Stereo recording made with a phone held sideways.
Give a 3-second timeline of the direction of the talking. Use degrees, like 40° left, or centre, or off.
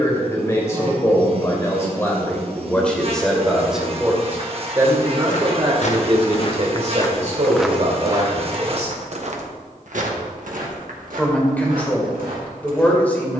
20° left, 20° right, 50° right, 10° left, 10° left.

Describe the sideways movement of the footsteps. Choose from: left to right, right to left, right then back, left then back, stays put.
left to right.